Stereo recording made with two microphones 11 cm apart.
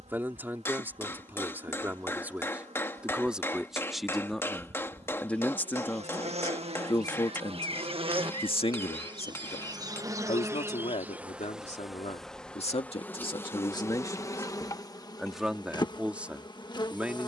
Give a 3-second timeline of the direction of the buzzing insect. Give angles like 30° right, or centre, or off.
80° right, 70° right, 60° right, 20° right, 20° left, 40° left.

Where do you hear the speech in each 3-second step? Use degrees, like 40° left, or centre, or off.
20° right, centre, 40° left, 70° left, 50° left, 10° right.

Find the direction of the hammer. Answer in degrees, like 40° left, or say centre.
20° left.